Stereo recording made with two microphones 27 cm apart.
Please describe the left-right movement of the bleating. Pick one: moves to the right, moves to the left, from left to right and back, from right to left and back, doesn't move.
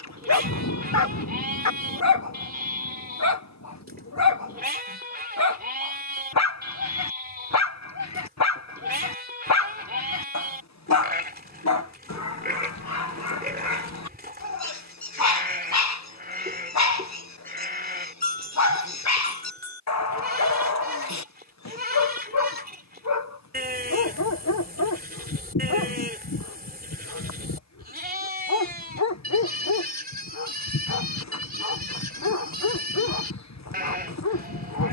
doesn't move.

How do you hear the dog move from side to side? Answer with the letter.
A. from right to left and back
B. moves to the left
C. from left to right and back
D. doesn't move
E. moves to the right
D.